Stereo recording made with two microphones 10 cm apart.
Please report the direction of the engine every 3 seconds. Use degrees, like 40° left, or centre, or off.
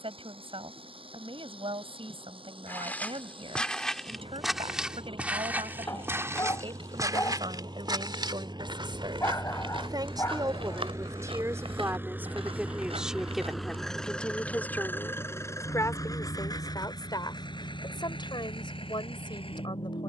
60° right, 60° right, 50° right, 30° right, centre, 40° left, 60° left.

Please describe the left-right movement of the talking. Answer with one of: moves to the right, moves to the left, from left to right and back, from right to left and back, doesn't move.
moves to the left.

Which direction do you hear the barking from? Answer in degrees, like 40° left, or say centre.
30° left.